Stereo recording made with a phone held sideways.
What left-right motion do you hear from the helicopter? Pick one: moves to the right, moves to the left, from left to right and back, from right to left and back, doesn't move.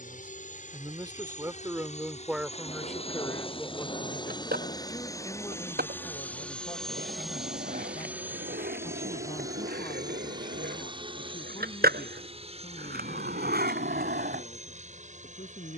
moves to the right.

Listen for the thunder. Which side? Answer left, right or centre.
left.